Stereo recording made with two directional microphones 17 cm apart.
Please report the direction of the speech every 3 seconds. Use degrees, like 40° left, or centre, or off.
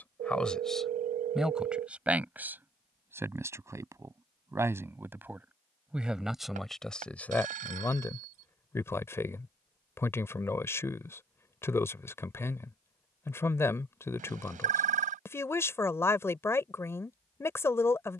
centre, 10° right, 10° left, 10° left, 10° left, 10° left.